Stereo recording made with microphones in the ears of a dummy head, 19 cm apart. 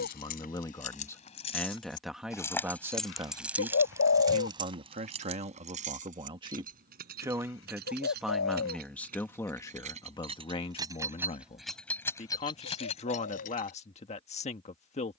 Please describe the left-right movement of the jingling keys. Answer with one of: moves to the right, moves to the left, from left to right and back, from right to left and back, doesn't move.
from left to right and back.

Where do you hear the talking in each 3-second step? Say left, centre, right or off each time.
centre, right, centre, left, left.